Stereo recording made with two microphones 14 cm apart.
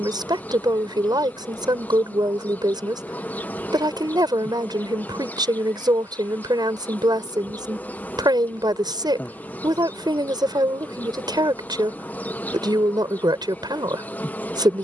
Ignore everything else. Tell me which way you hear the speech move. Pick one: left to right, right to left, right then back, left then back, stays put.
stays put.